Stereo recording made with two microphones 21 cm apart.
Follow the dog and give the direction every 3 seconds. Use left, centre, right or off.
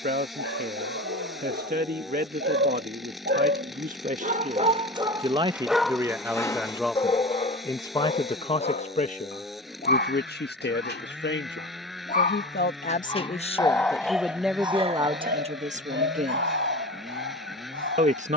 right, right, left, left, centre, right.